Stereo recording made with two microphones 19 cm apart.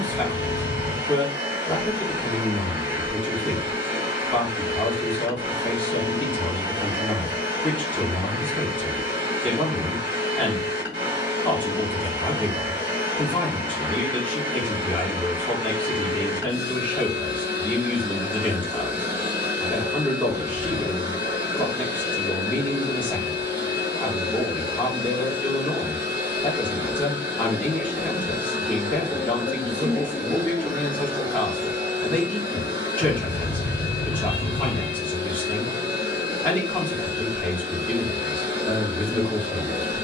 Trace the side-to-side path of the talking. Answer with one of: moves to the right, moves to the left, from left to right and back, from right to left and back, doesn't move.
doesn't move.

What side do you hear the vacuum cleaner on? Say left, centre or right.
left.